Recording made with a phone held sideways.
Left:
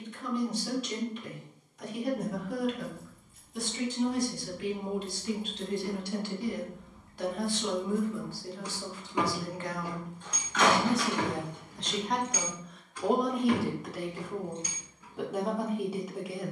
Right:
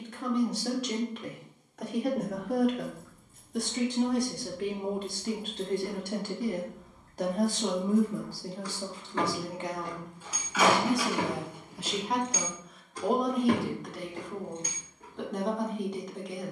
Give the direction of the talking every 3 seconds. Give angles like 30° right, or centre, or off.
70° right, 60° right, 40° right, 20° right, centre, 10° left.